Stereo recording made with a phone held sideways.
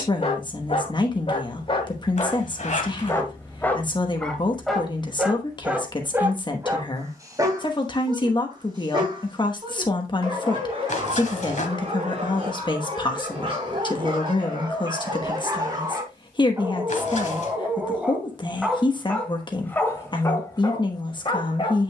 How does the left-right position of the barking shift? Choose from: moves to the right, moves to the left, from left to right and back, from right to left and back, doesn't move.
from left to right and back.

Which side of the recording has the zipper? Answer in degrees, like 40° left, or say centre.
60° left.